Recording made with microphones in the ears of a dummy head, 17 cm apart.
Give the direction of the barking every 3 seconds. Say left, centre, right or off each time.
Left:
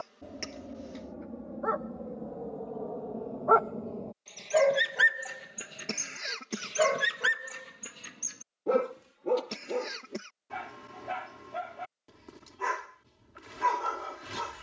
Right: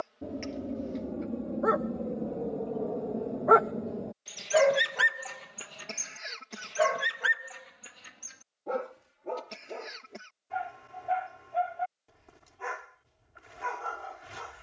right, centre, left, left, left.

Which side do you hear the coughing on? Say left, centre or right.
left.